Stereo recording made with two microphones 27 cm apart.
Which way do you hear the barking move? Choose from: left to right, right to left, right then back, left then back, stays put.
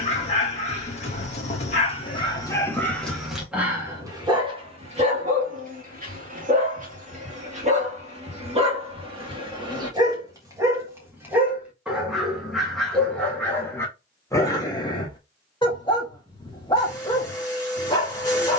right then back.